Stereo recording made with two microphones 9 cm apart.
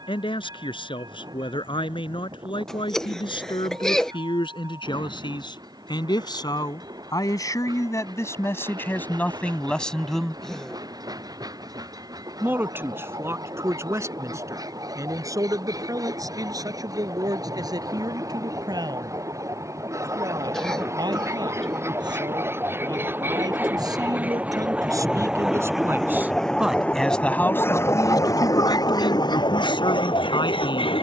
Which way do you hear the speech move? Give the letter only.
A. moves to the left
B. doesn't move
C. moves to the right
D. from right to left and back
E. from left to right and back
E.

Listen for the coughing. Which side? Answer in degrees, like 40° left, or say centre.
10° left.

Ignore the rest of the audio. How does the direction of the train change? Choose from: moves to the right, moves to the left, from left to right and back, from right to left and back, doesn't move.
moves to the left.